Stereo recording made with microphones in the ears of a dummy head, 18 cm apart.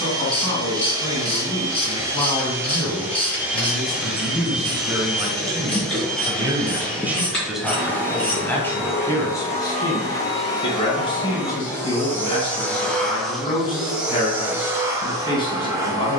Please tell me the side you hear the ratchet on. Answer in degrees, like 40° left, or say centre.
10° left.